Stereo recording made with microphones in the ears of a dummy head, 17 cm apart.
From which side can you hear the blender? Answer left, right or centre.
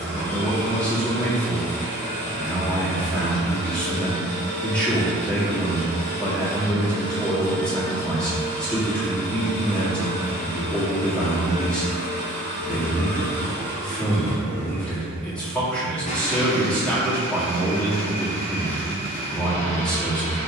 left.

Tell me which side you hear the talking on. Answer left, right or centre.
centre.